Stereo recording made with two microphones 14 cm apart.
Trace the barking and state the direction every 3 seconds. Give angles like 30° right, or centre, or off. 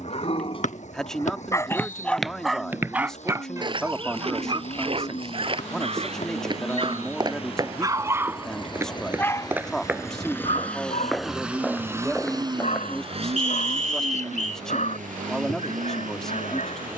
30° left, 30° right, 30° right, 40° left, 60° left, 60° left.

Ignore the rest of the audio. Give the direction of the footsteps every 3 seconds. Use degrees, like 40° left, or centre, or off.
centre, 40° right, 30° right, 10° right, 10° left, off.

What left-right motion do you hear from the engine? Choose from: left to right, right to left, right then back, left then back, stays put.
left to right.